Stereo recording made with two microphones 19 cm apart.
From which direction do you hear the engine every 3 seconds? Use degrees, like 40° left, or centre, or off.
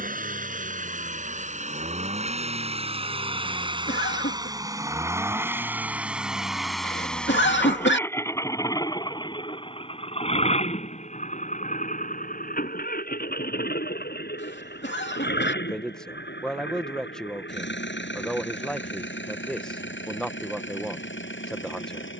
40° right, 20° right, 10° left, 30° left, 50° left, 60° left, 70° left, 70° left.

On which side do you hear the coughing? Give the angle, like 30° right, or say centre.
60° left.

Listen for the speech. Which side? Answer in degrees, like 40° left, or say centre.
centre.